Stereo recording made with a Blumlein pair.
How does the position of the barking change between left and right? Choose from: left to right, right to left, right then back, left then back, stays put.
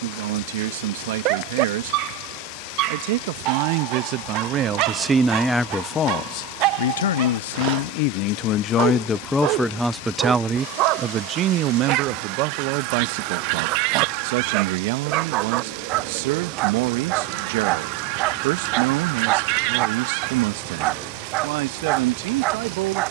stays put.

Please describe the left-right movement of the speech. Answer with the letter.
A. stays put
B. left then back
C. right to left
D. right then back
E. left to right
B.